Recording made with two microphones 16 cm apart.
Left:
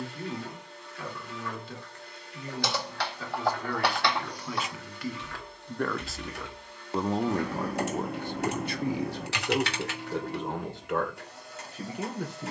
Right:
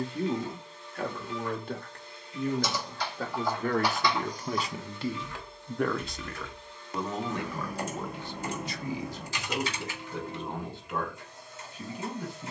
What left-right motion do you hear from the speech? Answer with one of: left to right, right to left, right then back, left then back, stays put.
right to left.